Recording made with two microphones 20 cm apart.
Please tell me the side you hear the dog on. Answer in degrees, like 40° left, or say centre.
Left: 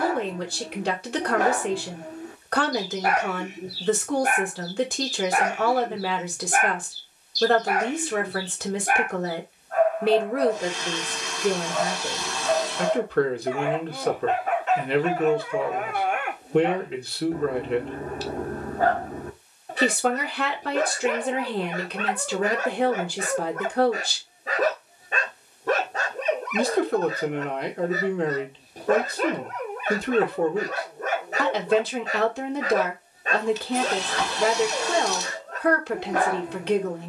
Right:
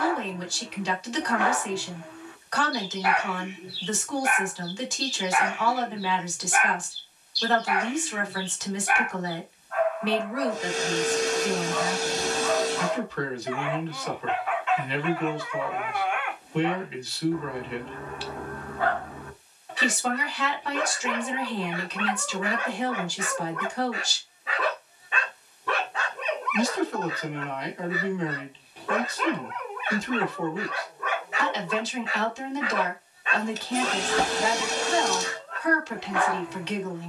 40° left.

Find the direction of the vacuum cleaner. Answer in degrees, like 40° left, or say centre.
50° right.